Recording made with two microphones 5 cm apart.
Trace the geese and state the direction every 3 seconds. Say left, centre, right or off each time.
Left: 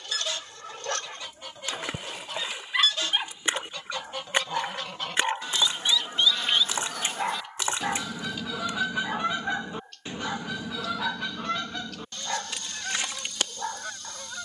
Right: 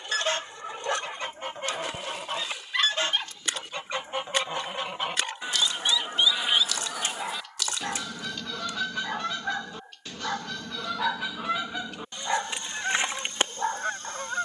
right, right, centre, centre, right.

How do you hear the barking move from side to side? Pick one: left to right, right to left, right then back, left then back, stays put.
left then back.